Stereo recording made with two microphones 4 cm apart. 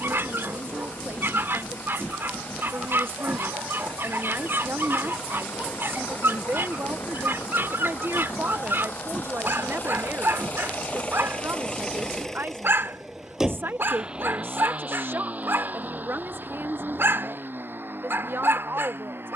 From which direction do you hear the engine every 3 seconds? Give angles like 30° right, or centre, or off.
80° left, 80° left, 70° left, 40° left, 10° right, 50° right, 60° right.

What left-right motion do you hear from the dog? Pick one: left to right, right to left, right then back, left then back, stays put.
stays put.